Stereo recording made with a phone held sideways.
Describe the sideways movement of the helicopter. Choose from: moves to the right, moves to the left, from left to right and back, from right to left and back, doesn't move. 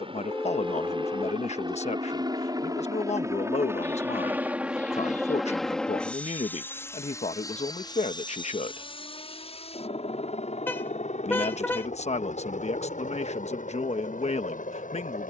moves to the left.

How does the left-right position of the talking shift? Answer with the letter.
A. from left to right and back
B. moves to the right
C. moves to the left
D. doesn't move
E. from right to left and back
D.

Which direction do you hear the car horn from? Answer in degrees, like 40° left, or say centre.
10° left.